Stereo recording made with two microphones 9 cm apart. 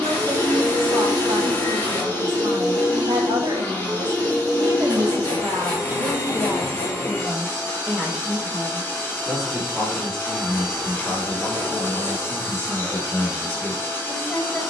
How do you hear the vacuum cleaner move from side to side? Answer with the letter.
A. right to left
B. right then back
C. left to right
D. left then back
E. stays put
E.